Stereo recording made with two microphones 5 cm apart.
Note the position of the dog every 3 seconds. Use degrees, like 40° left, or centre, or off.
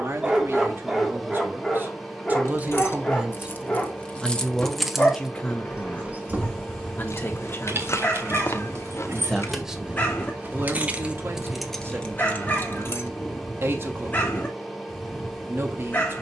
centre, 20° left, 30° left, 30° left, 30° left, 30° left.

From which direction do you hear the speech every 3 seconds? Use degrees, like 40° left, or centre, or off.
40° right, 10° left, 40° left, 30° right, 50° right, 50° right.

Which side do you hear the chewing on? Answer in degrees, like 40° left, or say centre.
60° left.